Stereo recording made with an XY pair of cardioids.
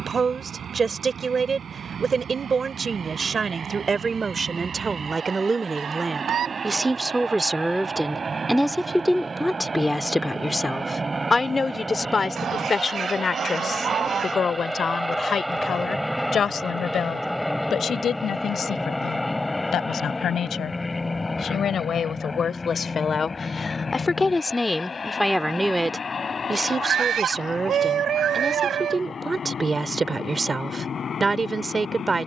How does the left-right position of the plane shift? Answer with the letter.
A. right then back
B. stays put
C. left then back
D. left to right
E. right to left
E.